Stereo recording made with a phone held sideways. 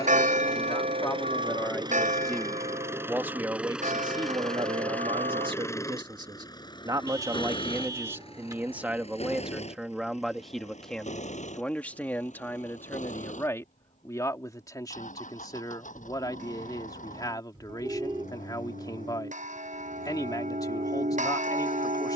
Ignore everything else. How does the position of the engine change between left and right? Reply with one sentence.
You can hear the engine go from the right side to the left.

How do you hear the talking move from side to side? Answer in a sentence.
You can hear the talking go right and come back.